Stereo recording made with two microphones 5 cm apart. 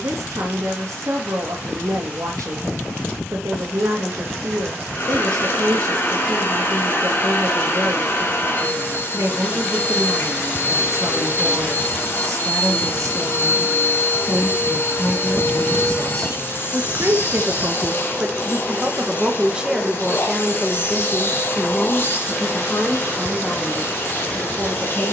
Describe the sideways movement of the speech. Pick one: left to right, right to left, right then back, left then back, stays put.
right to left.